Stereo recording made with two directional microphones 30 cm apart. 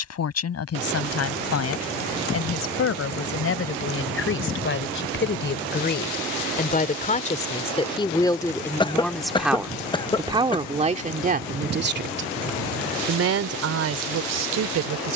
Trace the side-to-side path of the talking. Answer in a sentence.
You can hear the talking travel towards the right.